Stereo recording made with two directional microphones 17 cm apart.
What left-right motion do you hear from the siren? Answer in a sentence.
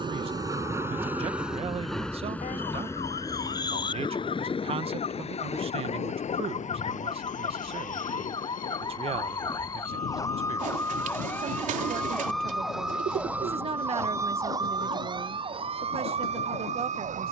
You can hear the siren move from left to right.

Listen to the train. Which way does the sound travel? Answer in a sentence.
You can hear the train go from the right side to the left.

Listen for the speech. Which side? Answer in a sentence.
You can hear the speech on the right.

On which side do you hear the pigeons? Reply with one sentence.
In this clip you hear the pigeons on the right.